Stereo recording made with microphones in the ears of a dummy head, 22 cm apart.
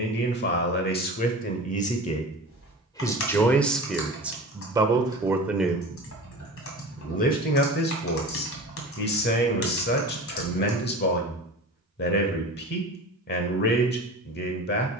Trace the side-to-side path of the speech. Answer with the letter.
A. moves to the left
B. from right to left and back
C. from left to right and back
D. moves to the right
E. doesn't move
C.